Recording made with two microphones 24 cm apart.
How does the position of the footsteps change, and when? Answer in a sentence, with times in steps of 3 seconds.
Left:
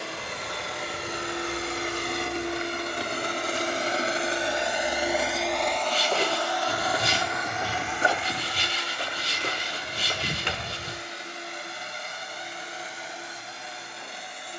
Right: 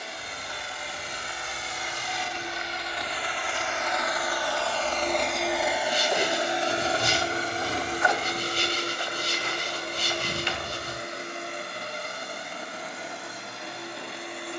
You can hear the footsteps on the left from 0 s, in the centre from 3 s, on the left from 6 s and not at all from 12 s.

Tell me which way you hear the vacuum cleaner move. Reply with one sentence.
In this clip you hear the vacuum cleaner move to the right.